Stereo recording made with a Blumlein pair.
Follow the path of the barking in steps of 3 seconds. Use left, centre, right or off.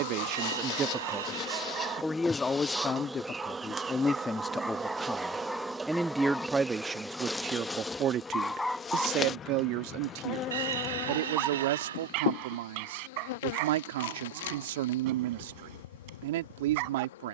right, centre, centre, right, right, right.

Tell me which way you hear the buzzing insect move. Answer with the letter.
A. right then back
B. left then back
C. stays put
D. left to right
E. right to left
A.